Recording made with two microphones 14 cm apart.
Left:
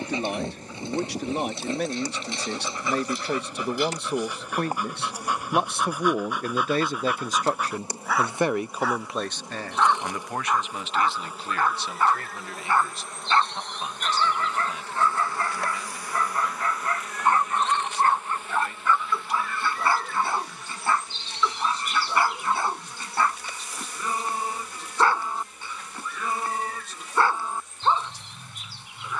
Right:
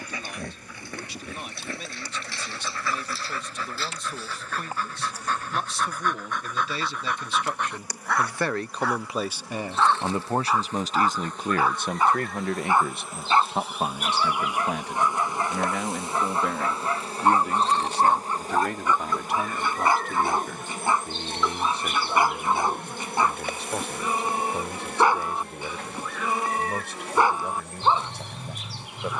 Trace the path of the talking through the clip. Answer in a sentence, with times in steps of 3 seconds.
In this clip you hear the talking on the left from 0 s and on the right from 9 s.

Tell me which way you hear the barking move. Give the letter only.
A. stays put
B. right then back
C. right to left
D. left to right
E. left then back
D.